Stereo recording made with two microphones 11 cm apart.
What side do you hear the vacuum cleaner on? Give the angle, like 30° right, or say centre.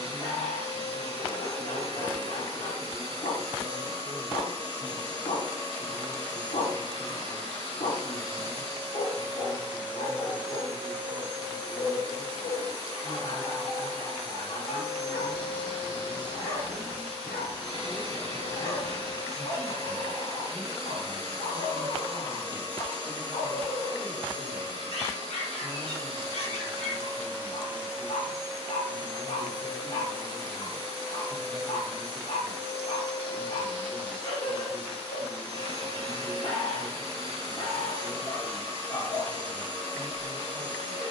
70° left.